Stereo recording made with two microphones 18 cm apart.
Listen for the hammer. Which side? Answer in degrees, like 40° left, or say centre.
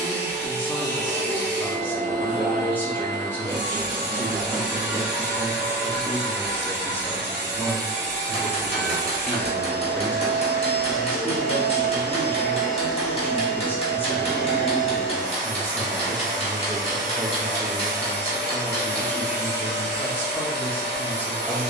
30° left.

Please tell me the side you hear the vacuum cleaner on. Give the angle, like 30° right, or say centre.
70° left.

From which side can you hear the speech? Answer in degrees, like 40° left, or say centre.
10° left.